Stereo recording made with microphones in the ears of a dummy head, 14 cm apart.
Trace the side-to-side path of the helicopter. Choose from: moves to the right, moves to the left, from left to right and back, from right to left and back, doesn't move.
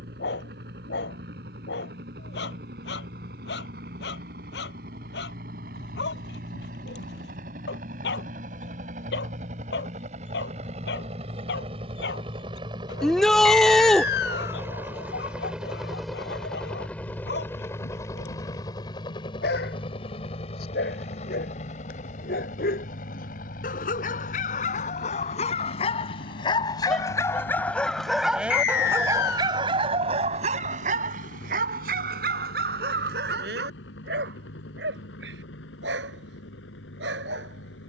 moves to the left.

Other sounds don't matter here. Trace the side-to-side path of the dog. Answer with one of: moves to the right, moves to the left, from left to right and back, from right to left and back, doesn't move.
moves to the right.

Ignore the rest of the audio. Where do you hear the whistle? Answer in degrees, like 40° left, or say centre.
70° left.